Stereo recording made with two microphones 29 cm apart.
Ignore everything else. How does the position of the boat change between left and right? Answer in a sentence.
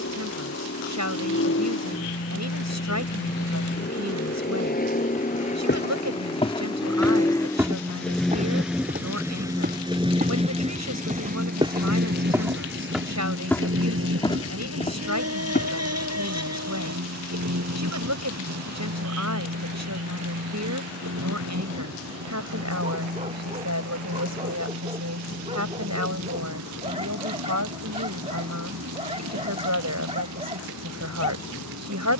You can hear the boat travel towards the right.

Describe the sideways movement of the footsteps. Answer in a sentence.
In this clip you hear the footsteps move from left to right and back again.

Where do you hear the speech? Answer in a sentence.
In this clip you hear the speech on the right.